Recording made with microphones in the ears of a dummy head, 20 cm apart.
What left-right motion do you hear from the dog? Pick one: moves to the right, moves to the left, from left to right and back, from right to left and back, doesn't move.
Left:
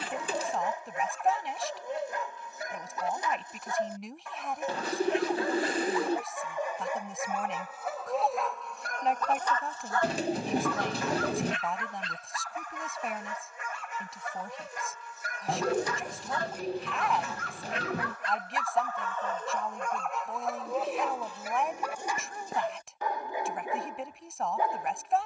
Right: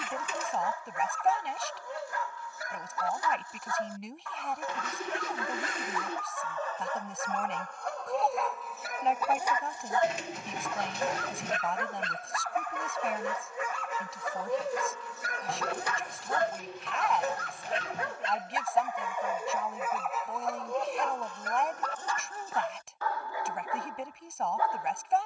from left to right and back.